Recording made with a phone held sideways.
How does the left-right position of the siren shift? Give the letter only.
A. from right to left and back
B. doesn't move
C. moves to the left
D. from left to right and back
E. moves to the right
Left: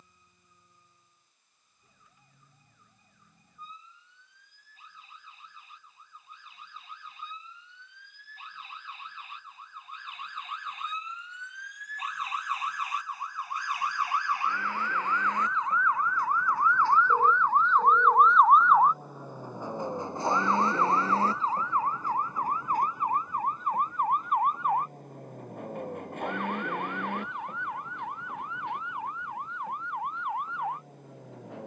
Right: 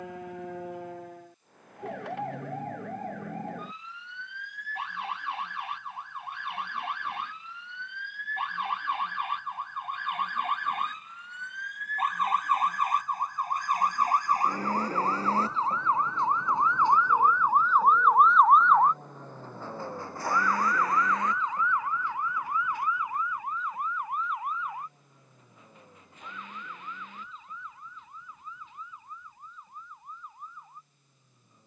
C.